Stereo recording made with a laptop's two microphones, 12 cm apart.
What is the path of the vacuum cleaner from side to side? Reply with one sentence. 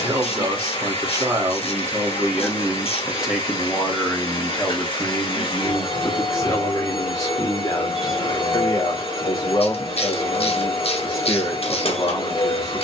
In this clip you hear the vacuum cleaner stay in one place.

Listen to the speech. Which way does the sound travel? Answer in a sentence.
In this clip you hear the speech go from the right side to the left.